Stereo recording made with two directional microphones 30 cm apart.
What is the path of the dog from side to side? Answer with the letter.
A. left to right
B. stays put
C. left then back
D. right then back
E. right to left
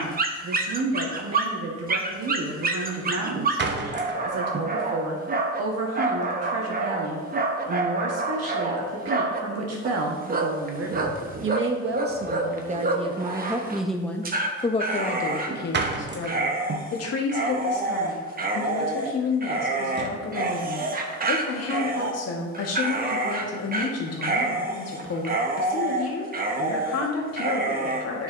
B.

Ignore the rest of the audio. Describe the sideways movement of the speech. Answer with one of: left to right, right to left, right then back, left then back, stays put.
right to left.